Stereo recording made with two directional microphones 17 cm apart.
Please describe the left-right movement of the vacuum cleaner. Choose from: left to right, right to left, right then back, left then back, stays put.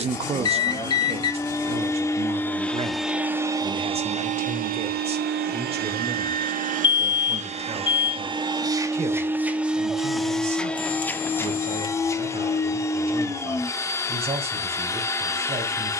right then back.